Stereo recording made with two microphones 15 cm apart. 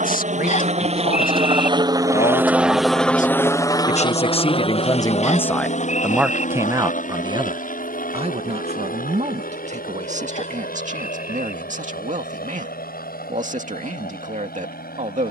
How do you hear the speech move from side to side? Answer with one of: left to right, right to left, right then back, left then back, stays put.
left to right.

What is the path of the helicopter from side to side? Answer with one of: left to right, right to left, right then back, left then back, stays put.
right to left.